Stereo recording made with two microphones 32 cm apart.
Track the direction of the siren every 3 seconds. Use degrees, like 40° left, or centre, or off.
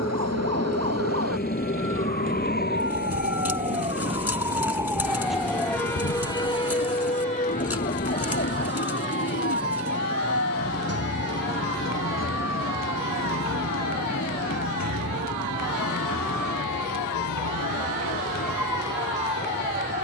40° right, 10° right, 20° left, 40° left, 50° left, 60° left, 60° left.